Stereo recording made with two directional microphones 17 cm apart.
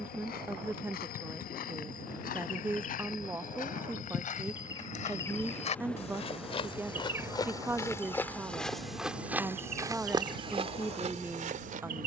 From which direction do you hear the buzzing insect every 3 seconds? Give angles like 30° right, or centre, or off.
50° left, 20° left, 20° right, 50° right.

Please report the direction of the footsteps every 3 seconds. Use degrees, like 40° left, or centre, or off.
60° left, 50° left, 20° left, 30° right.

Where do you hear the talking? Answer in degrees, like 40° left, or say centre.
10° right.